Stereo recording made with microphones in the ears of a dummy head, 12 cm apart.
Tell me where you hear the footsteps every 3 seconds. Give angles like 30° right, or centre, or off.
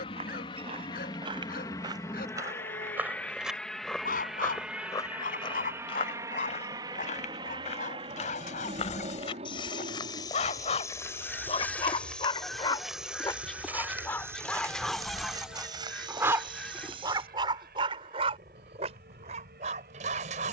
30° right, 20° left, 50° left, 30° left, 10° right, 30° right, off.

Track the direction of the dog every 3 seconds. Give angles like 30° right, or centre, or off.
70° left, 60° left, 60° left, 40° left, 20° left, 20° right, 50° right.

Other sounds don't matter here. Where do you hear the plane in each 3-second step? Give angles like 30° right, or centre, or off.
30° left, centre, 30° right, 50° right, 60° right, 60° right, 70° right.